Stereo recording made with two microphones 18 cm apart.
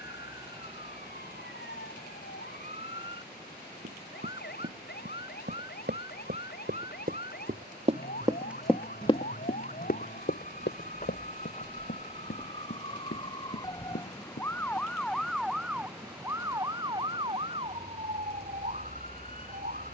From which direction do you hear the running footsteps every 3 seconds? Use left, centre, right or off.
off, right, right, left, left, off, off.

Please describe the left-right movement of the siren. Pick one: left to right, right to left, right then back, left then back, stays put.
left to right.